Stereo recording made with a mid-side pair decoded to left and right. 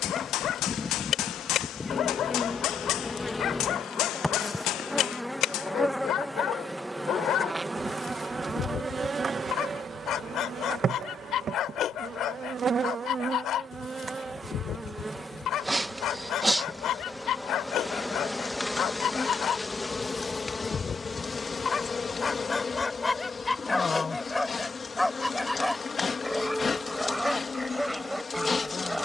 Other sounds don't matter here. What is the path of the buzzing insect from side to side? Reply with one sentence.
In this clip you hear the buzzing insect move from left to right and back again.